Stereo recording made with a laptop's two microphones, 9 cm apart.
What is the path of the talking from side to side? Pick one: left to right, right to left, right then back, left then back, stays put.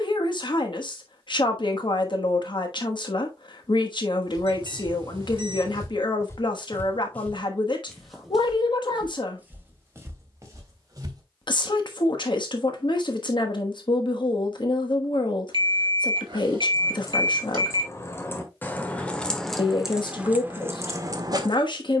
stays put.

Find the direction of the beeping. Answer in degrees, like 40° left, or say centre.
60° right.